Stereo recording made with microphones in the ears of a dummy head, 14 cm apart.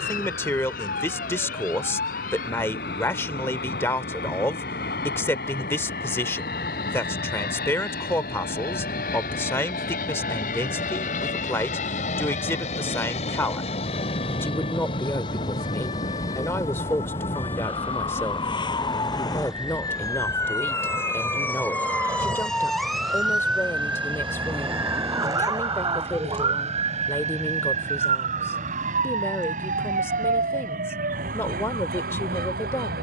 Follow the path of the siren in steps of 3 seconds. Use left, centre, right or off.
left, left, left, left, left, left, left, centre, right, right, right.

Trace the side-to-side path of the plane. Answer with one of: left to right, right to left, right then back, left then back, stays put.
left to right.